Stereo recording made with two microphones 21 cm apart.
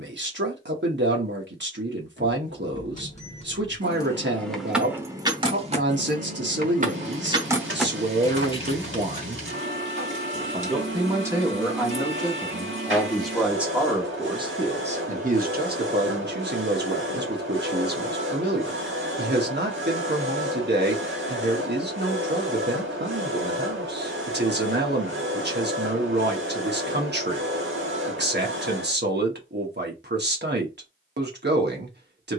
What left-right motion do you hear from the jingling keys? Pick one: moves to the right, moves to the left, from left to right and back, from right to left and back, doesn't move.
from left to right and back.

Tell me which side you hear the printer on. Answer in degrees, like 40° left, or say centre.
70° right.